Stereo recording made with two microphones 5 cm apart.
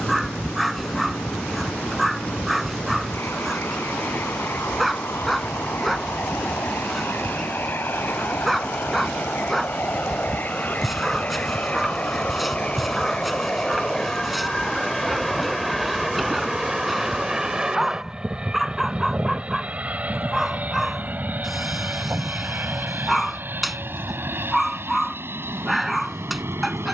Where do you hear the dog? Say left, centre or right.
centre.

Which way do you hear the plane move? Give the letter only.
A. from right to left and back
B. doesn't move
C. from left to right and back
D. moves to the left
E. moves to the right
E.